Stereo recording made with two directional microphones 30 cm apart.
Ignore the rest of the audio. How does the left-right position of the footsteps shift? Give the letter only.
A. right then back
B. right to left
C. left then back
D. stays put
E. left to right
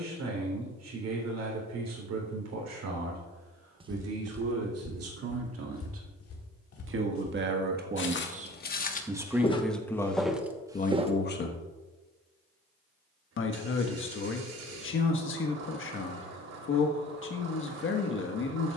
C.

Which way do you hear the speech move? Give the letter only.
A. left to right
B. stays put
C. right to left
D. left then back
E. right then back
C.